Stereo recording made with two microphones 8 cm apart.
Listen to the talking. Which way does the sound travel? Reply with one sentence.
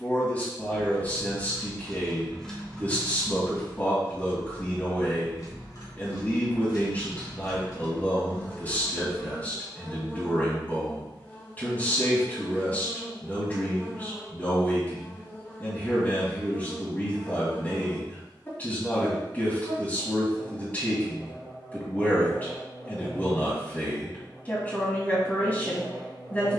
You can hear the talking stay in one place.